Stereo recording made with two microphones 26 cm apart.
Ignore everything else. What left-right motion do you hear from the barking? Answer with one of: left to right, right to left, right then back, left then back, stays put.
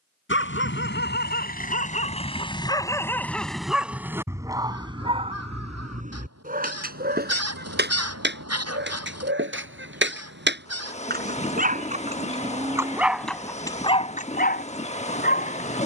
right then back.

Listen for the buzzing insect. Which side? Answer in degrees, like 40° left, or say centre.
30° left.